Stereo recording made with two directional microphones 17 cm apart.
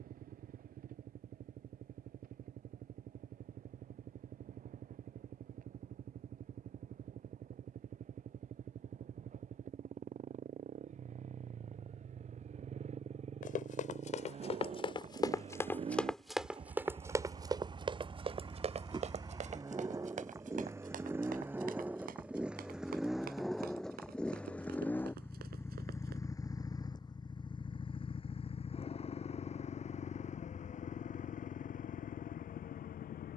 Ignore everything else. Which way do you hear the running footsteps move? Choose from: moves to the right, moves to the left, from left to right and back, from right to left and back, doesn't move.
moves to the right.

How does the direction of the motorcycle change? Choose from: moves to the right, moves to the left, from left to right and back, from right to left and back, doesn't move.
moves to the left.